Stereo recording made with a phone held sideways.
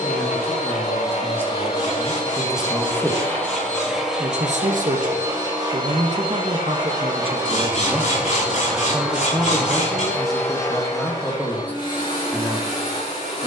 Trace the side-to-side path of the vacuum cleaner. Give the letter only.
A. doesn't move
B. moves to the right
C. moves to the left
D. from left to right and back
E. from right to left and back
D.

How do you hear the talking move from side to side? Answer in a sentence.
In this clip you hear the talking move from left to right and back again.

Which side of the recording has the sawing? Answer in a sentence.
You can hear the sawing on the left.